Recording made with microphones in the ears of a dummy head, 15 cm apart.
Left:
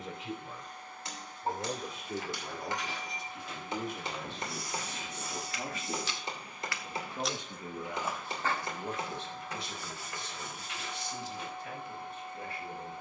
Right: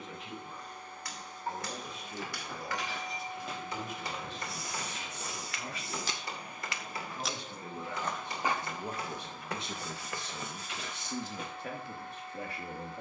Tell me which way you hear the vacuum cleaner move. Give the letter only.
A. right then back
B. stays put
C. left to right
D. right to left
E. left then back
D.